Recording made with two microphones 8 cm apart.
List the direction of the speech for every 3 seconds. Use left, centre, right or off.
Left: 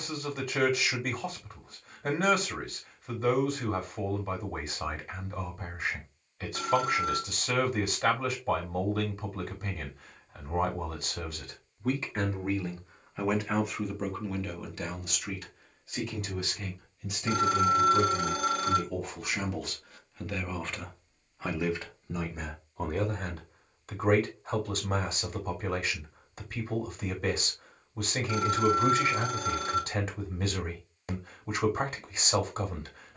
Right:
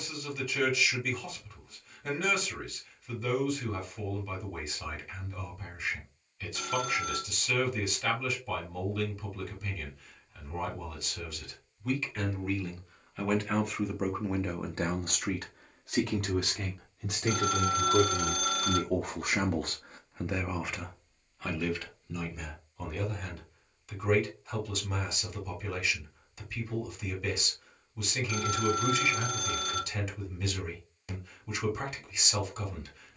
left, left, left, left, centre, right, right, left, left, left, left.